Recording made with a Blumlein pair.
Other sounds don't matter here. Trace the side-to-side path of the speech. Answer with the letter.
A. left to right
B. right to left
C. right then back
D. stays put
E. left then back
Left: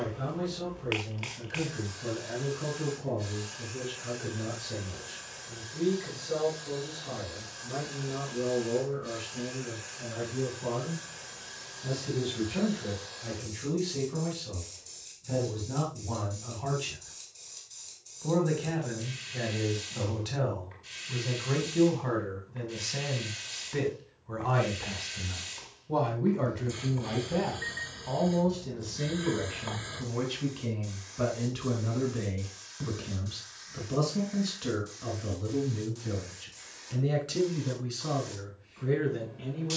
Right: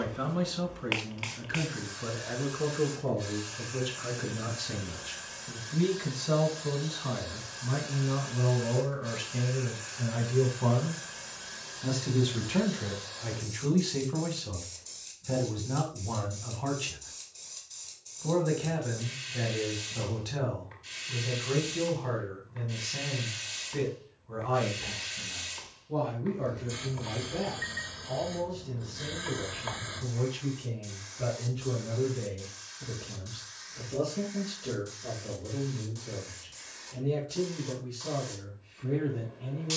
B.